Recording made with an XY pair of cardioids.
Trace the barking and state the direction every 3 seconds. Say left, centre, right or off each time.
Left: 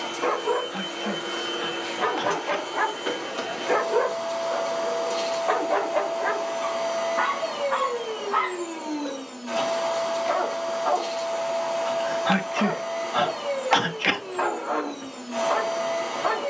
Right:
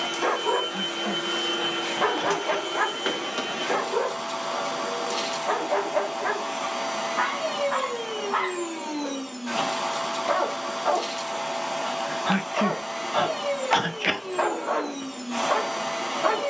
right, centre, centre, right, right, right.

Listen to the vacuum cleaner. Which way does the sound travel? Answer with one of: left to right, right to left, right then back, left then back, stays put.
stays put.